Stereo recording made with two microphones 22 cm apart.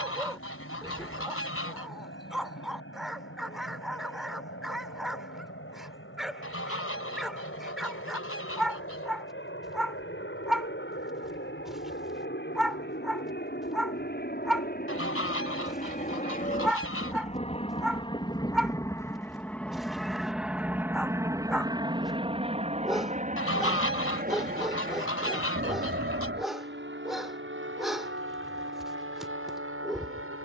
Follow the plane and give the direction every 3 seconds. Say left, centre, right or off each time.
left, left, left, left, left, left, centre, right, right, right.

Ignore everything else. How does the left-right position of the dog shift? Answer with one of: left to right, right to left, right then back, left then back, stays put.
stays put.